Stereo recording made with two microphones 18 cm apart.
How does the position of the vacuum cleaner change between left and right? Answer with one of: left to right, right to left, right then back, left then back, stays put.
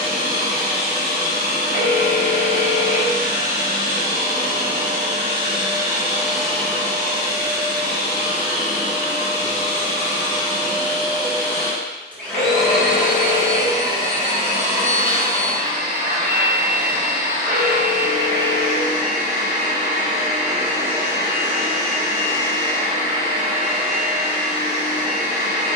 left then back.